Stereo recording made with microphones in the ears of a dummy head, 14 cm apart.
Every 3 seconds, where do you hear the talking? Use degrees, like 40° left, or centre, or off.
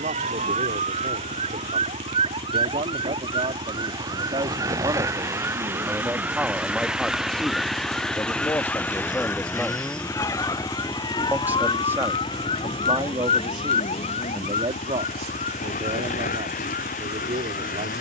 50° right, 30° right, centre, centre, 30° right, 50° right.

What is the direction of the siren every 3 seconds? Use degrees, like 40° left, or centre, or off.
40° right, 20° right, centre, 20° left, 40° left, 50° left.